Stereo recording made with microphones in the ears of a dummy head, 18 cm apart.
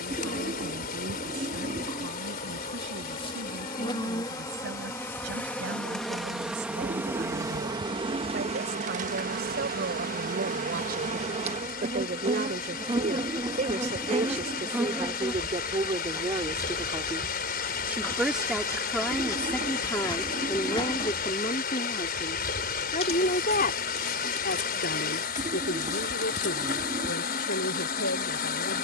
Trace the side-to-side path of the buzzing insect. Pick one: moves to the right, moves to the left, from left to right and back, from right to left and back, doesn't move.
from left to right and back.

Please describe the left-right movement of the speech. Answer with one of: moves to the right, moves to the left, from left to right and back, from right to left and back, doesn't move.
moves to the left.